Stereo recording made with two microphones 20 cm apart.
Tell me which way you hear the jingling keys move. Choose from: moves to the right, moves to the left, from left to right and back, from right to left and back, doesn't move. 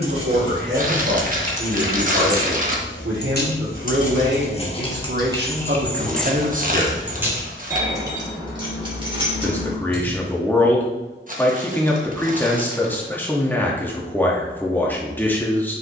from right to left and back.